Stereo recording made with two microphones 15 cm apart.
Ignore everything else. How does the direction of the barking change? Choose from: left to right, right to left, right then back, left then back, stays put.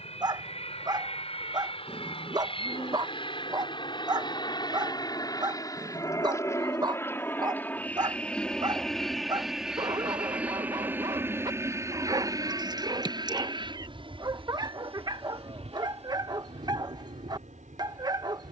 stays put.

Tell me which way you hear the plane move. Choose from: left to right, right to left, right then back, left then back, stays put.
left to right.